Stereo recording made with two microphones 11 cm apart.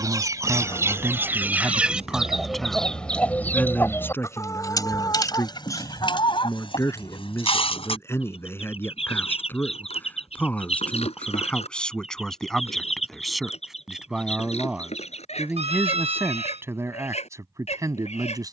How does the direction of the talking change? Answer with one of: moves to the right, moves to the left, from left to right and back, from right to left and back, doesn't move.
from right to left and back.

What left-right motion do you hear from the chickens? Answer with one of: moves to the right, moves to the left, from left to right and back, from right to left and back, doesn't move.
moves to the left.